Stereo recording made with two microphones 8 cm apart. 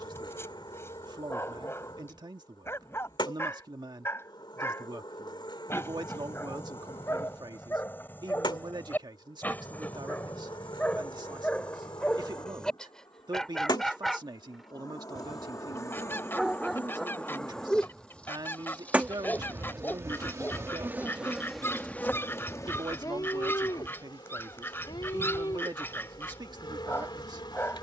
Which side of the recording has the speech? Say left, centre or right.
right.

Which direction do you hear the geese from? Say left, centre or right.
left.